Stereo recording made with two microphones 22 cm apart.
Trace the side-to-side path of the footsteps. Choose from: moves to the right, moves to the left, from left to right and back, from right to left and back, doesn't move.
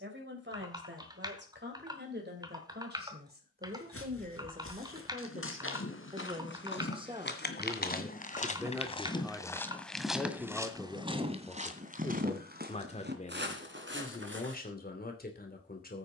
moves to the right.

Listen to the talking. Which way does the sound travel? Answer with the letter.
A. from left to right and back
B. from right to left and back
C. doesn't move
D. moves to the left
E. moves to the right
D.